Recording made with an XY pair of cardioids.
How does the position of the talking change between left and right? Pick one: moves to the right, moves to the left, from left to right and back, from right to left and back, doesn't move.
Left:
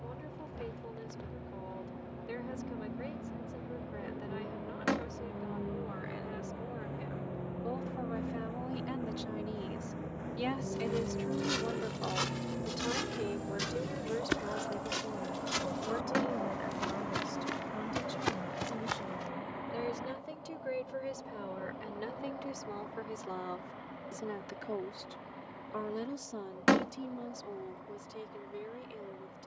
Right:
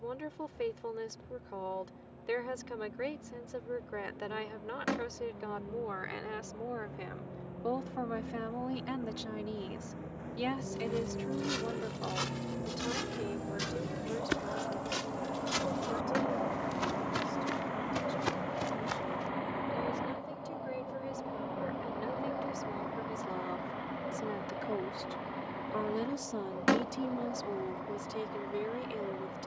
from right to left and back.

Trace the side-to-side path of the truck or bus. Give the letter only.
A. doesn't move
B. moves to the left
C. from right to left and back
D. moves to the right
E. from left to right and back
D.